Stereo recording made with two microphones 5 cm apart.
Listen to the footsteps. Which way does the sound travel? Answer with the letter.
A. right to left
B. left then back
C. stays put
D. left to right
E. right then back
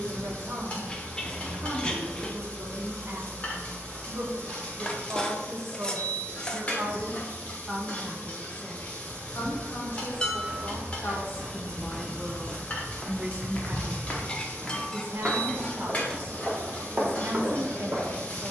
B.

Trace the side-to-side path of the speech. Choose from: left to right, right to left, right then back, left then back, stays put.
left then back.